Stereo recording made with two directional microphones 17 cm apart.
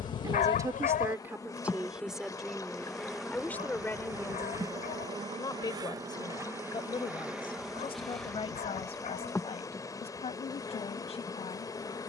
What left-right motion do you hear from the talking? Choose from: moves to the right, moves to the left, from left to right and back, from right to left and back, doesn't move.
moves to the left.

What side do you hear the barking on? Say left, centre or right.
left.